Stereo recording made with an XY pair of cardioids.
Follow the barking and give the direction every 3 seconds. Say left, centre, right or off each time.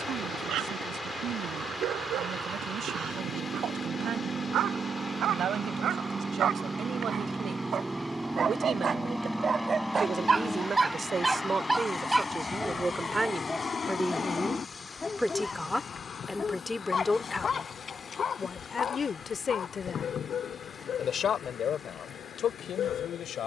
right, right, right, right, centre, left, left, left.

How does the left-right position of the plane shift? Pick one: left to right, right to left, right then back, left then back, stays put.
right to left.